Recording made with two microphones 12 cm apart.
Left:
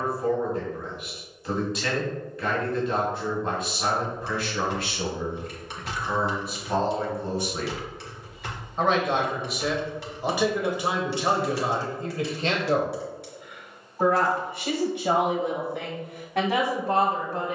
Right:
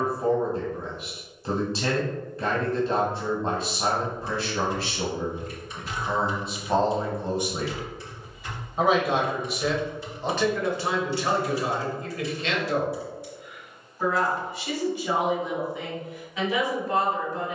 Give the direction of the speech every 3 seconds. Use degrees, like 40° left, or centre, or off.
30° right, 30° right, 20° right, 10° left, 40° left, 70° left.